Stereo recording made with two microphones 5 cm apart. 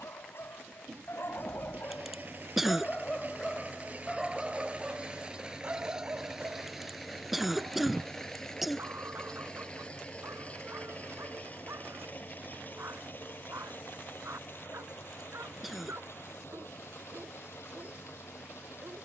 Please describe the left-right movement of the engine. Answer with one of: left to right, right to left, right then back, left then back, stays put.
right to left.